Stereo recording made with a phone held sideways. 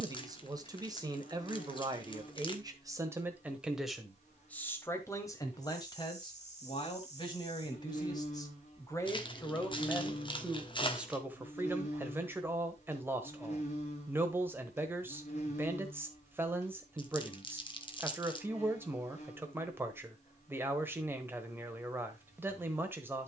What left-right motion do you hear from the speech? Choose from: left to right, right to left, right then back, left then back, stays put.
left then back.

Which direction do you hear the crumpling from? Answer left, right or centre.
left.